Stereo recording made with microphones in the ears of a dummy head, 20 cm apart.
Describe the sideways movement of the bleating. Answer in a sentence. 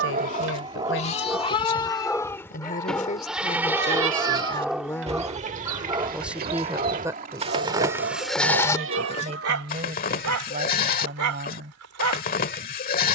You can hear the bleating move from left to right and back again.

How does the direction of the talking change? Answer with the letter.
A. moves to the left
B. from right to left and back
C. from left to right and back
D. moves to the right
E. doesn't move
D.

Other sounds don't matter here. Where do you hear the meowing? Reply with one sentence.
In this clip you hear the meowing on the right.